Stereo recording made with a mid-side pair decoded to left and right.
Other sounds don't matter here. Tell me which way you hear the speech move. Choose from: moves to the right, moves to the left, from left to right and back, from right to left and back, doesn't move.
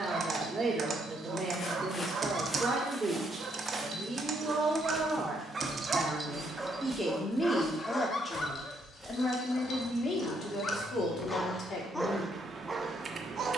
moves to the left.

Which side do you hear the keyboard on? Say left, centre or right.
right.